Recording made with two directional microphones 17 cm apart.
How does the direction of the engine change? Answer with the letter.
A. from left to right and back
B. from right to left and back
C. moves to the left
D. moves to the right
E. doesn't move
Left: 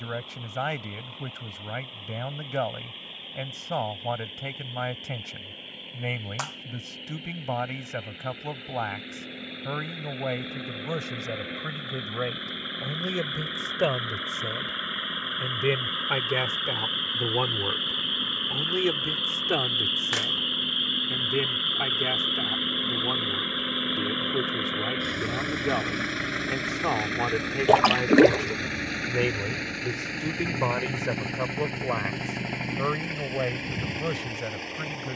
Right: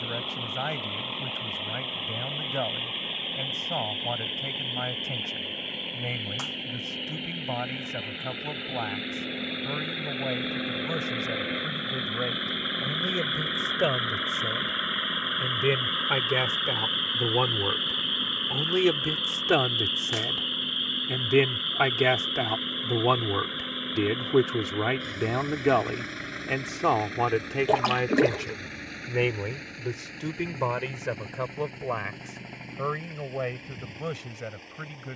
C.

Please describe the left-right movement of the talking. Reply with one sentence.
In this clip you hear the talking move from left to right and back again.